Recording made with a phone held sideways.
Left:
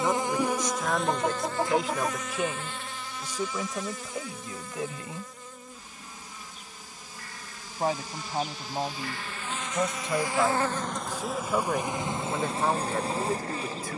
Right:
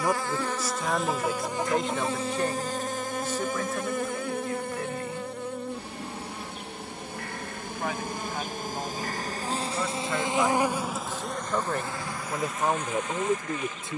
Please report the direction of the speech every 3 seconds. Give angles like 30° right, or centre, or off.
centre, 20° left, 30° left, 20° left, 10° right.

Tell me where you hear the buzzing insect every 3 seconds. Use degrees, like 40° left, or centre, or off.
10° right, 60° right, 60° right, 20° right, 30° left.